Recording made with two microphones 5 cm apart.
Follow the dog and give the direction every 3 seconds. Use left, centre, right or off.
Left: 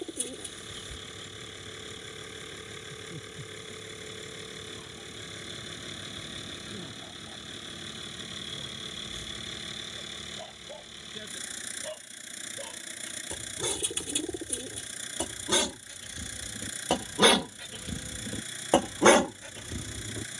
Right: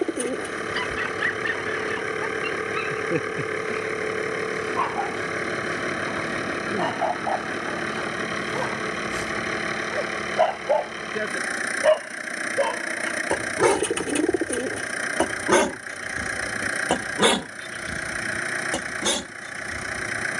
right, right, right, right, right, right, left.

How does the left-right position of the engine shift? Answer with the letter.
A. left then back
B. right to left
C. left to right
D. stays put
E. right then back
D.